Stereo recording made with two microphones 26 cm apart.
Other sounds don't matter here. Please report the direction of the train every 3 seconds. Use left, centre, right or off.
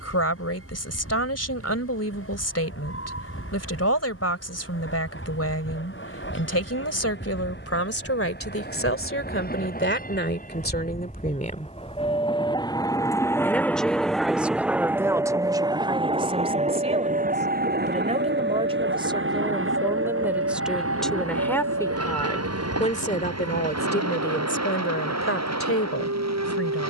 left, left, left, left, centre, right, right, right, right.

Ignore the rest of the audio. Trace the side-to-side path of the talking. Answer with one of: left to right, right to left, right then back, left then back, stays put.
right then back.